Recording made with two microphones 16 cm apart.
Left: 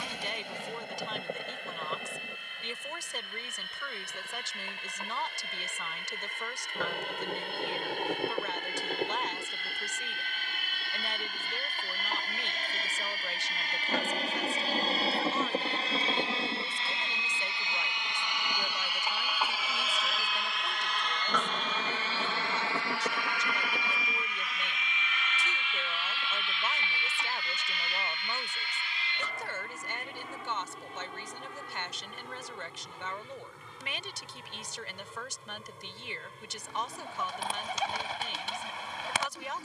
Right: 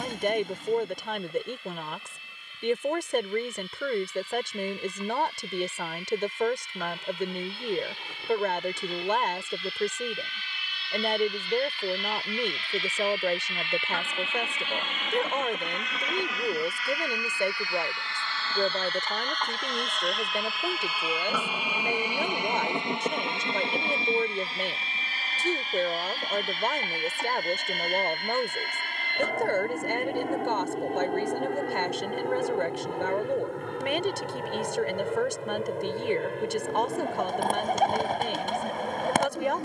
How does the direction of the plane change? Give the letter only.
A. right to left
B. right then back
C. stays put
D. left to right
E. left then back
D.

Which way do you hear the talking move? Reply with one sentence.
In this clip you hear the talking stay in one place.